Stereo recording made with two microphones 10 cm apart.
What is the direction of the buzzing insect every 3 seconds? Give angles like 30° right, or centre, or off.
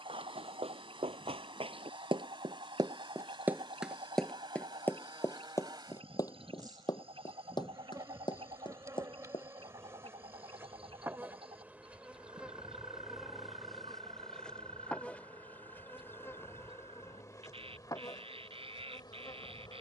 60° right, 50° right, 40° right, 20° right, centre, 30° left, 40° left.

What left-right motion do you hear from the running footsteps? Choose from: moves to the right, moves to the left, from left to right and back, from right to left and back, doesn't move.
moves to the left.